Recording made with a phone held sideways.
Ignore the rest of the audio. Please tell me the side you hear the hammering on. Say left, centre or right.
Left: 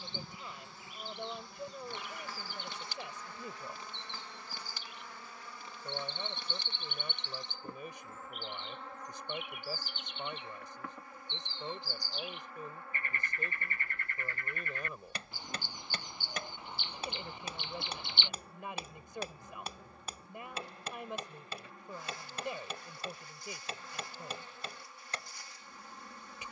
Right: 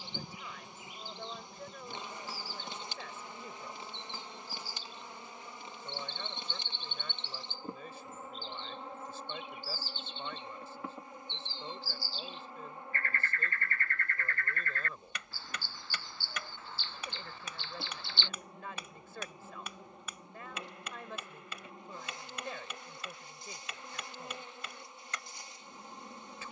left.